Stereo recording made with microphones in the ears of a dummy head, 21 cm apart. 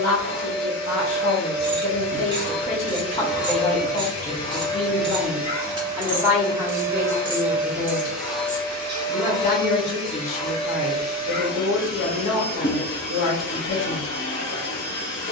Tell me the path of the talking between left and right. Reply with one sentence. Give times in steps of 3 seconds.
In this clip you hear the talking on the left from 0 s, in the centre from 3 s and on the left from 9 s.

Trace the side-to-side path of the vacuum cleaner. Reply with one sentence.
You can hear the vacuum cleaner go right and come back.